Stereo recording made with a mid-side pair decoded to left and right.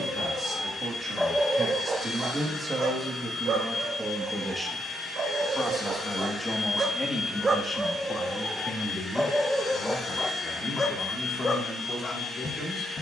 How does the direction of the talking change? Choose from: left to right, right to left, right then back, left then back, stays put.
right to left.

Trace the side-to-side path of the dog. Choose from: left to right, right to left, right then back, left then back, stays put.
right then back.